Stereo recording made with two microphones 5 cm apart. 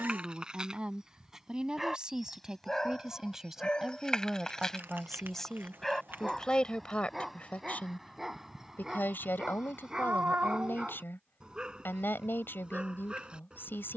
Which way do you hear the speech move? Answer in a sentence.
In this clip you hear the speech go from the right side to the left.